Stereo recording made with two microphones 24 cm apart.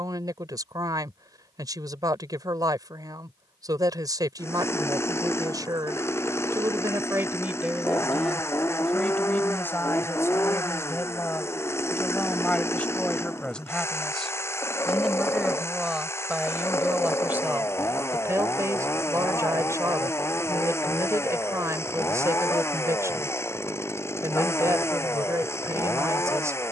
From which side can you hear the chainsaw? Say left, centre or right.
centre.